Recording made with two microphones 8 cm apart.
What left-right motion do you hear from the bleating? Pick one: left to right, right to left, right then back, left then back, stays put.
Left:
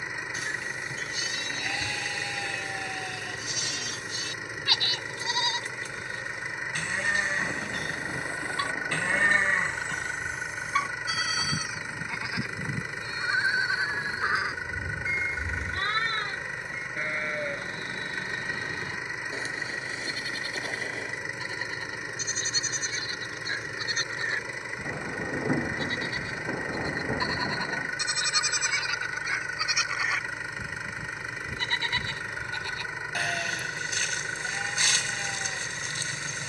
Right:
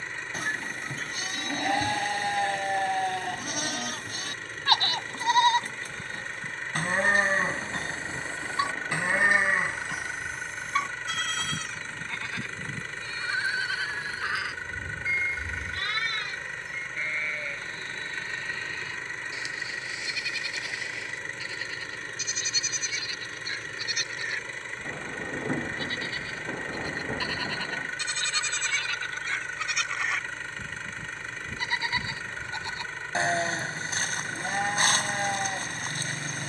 left then back.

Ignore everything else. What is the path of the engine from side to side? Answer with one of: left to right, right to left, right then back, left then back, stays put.
stays put.